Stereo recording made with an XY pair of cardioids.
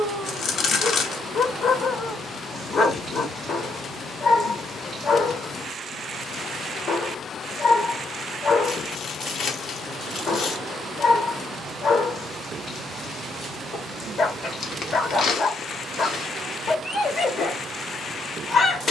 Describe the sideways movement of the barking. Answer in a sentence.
In this clip you hear the barking stay put.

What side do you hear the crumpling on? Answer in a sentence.
In this clip you hear the crumpling on the left.